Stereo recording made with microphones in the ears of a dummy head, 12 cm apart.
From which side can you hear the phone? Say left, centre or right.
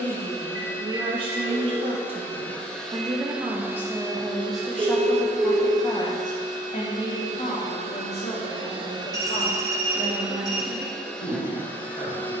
right.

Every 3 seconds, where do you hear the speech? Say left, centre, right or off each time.
right, centre, left, left.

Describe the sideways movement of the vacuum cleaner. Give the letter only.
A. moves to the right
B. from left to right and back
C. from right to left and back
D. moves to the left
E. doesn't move
B.